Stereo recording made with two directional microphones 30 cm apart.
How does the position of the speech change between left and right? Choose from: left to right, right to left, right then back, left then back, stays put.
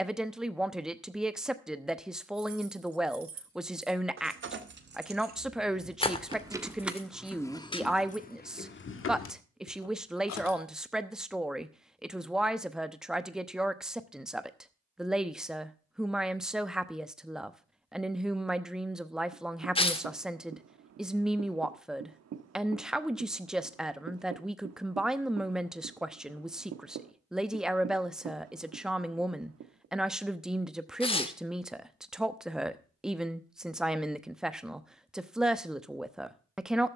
stays put.